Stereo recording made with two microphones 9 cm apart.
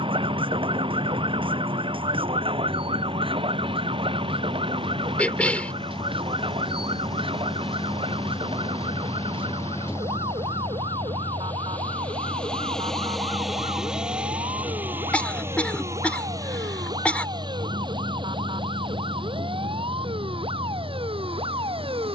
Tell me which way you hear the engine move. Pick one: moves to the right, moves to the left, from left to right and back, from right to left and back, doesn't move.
moves to the right.